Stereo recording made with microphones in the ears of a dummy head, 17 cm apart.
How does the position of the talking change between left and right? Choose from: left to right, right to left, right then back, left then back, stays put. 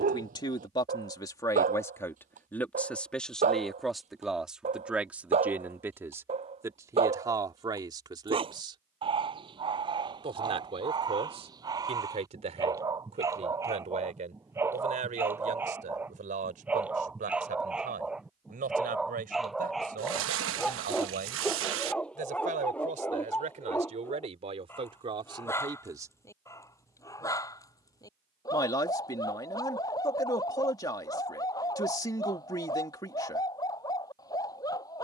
right then back.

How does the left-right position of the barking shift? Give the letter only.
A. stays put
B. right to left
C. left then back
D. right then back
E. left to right
B.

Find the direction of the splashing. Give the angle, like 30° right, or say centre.
70° right.